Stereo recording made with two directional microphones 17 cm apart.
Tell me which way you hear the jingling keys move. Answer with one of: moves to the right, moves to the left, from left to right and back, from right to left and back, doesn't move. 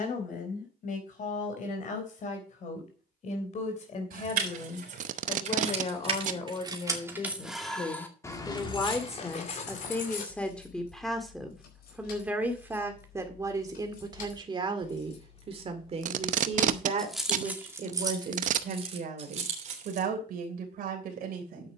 from right to left and back.